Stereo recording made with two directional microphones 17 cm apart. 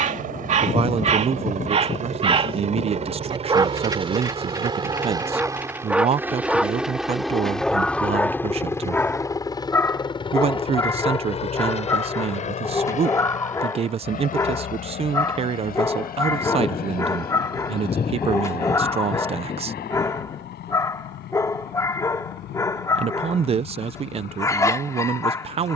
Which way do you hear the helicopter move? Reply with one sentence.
You can hear the helicopter move to the left.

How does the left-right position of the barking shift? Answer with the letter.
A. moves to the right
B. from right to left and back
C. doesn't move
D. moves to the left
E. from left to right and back
D.